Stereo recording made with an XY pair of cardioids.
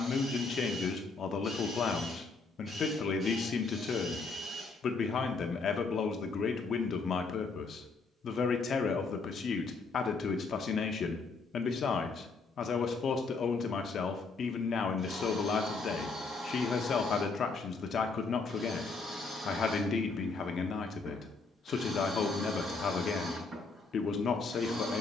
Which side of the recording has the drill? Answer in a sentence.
You can hear the drill on the right.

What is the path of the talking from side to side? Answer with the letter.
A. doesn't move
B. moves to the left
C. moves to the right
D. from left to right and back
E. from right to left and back
A.